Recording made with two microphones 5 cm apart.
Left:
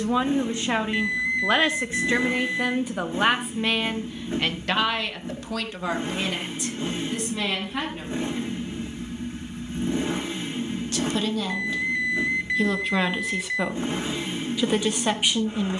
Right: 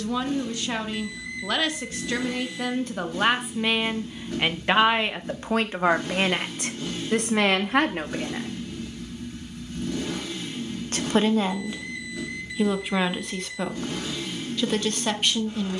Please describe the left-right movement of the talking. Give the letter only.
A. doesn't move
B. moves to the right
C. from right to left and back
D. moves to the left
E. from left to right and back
E.